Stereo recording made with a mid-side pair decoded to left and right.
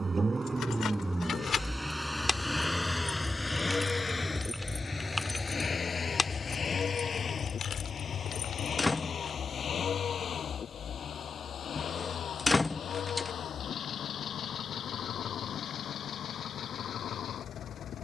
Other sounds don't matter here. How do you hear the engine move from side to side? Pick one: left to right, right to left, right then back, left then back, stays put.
right to left.